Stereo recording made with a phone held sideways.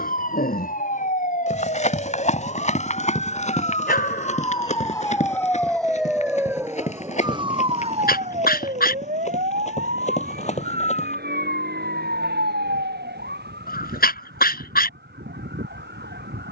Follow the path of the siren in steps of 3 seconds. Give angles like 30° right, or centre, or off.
50° left, 30° left, 30° right, 60° right, 80° right, 80° right.